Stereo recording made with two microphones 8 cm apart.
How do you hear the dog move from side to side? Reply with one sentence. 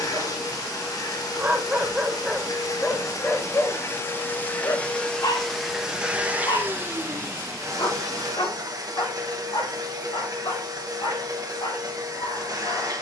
You can hear the dog move from right to left.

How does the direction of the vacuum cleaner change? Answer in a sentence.
In this clip you hear the vacuum cleaner move to the right.